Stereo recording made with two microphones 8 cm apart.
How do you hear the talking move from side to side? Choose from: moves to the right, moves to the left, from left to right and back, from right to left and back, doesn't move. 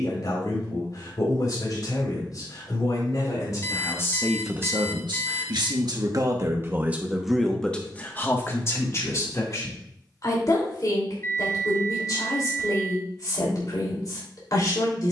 from left to right and back.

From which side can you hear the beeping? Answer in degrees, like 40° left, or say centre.
30° left.